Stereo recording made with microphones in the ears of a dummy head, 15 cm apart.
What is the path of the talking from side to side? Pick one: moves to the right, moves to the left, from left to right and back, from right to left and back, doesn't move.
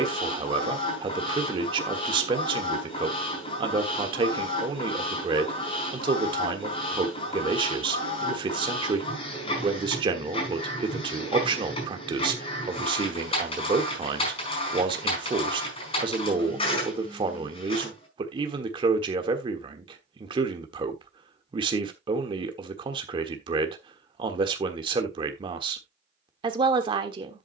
doesn't move.